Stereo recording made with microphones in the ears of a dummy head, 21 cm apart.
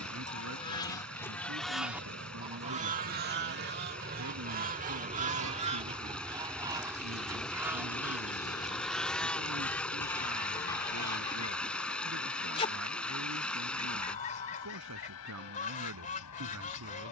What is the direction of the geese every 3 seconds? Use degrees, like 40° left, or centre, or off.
centre, 40° right, 10° right, 10° left, 30° left, 30° left.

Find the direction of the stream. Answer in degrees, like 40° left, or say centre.
centre.